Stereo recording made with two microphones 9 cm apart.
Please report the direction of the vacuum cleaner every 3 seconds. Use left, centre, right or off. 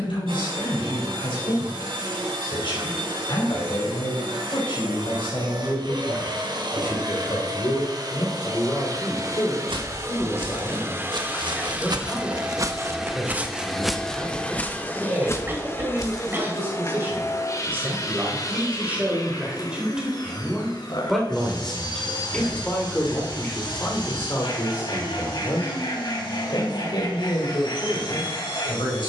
right, right, right, right, centre, left, left, left, left, left.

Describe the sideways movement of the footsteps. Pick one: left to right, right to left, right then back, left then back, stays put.
right to left.